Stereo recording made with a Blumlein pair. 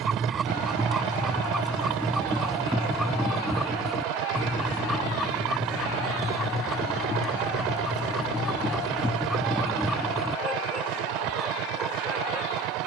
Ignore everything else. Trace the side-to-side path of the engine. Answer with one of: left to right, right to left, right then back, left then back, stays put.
stays put.